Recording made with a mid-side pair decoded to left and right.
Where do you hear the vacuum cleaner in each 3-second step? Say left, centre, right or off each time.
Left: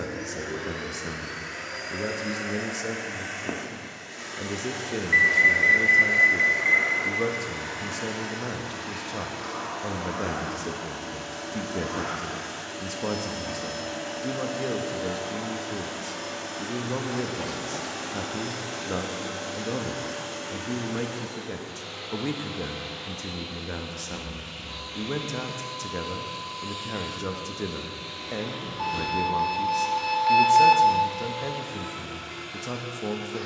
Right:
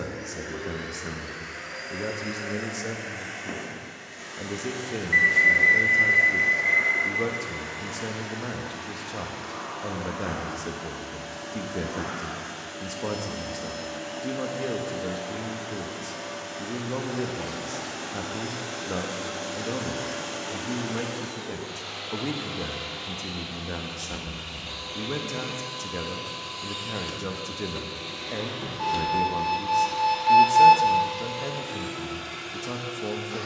left, left, left, left, left, left, centre, right, right, right, right.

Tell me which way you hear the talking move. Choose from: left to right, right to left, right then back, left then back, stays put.
stays put.